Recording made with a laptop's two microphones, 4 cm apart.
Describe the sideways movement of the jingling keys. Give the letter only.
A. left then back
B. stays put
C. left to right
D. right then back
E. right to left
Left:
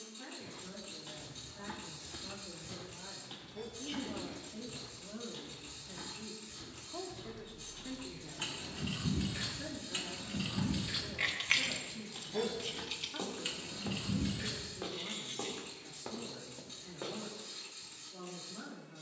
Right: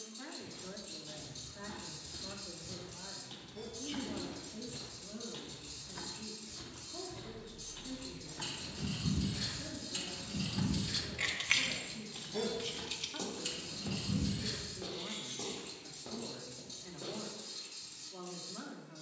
D.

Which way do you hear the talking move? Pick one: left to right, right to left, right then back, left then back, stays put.
left then back.